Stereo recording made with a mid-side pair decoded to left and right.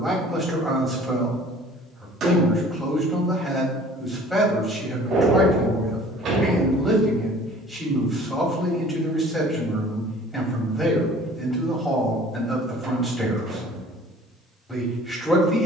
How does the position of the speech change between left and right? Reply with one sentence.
You can hear the speech stay in one place.